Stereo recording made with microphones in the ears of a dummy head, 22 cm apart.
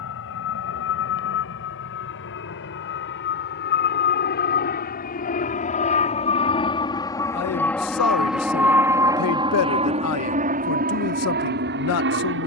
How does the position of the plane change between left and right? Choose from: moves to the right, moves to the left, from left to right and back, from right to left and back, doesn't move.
moves to the right.